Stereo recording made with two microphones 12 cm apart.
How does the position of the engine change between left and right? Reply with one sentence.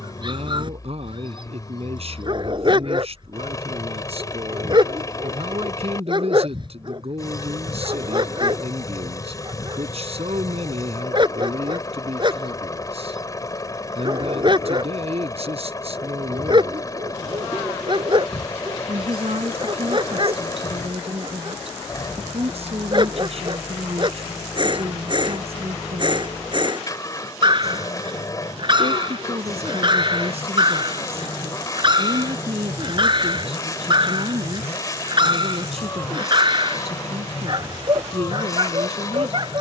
In this clip you hear the engine stay in one place.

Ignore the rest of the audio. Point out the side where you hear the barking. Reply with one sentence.
In this clip you hear the barking on the right.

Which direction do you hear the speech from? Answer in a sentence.
In this clip you hear the speech on the right.